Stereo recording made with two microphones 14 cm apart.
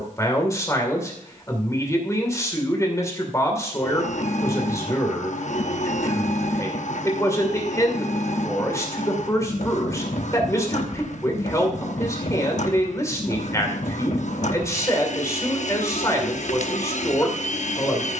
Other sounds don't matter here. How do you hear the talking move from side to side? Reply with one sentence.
You can hear the talking stay put.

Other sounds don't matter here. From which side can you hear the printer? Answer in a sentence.
In this clip you hear the printer on the left.